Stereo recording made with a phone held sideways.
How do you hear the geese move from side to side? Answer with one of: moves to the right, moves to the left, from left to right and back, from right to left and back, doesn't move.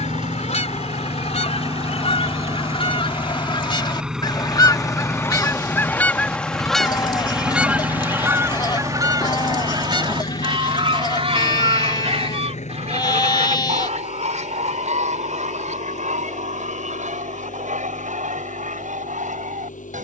moves to the right.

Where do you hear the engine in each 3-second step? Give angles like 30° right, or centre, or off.
30° right, centre, 30° left, 50° left, 60° left, 70° left, 70° left.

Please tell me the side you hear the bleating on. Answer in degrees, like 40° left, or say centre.
30° left.